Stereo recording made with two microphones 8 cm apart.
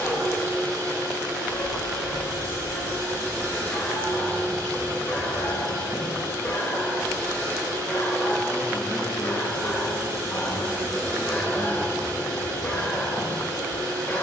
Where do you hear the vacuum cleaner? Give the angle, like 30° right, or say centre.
50° right.